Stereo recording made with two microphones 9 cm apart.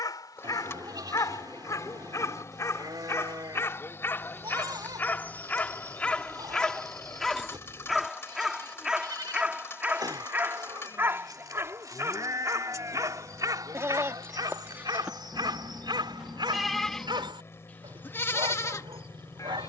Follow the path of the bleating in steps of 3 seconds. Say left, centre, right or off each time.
right, right, right, right, right, centre, left.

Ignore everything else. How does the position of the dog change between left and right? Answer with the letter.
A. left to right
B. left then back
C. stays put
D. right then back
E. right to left
A.